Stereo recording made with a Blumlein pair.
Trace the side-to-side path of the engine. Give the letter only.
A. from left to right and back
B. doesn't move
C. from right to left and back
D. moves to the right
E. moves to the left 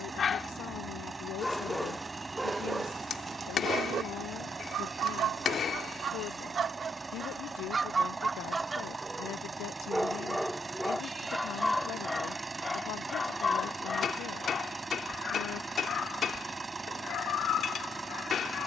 B.